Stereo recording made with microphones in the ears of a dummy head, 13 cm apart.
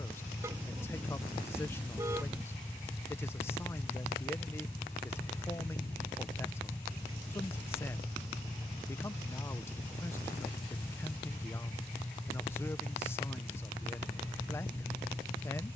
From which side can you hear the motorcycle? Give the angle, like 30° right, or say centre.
10° left.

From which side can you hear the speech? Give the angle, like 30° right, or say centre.
20° left.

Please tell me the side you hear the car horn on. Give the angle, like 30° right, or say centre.
20° right.